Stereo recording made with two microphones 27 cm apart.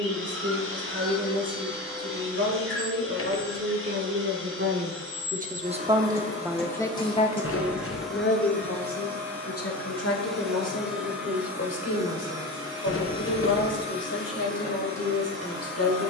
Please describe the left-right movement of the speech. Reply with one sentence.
You can hear the speech move from right to left.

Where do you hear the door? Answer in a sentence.
In this clip you hear the door on the left.